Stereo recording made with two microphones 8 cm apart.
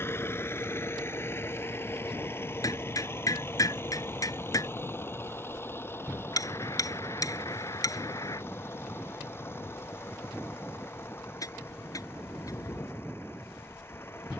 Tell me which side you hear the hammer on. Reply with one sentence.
In this clip you hear the hammer on the left.